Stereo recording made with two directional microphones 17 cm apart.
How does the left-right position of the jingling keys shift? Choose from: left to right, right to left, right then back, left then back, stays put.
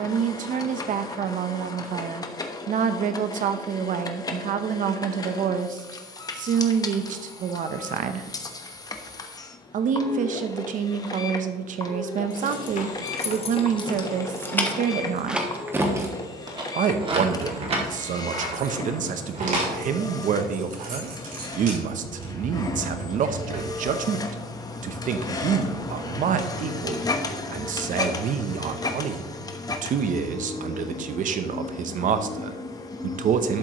left to right.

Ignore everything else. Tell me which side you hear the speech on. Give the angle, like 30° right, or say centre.
50° right.